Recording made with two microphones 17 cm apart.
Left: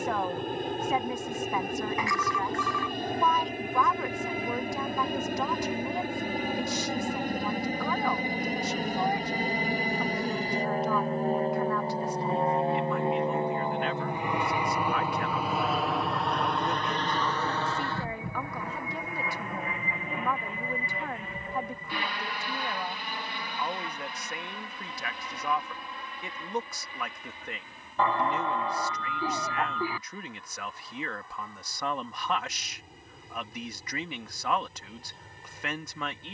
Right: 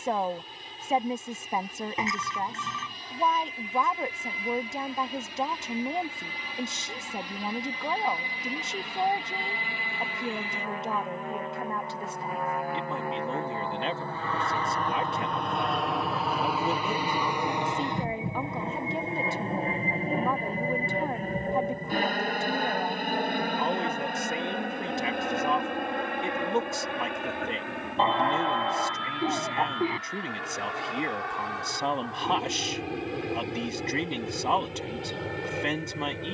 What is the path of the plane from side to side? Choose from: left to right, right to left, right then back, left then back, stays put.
left to right.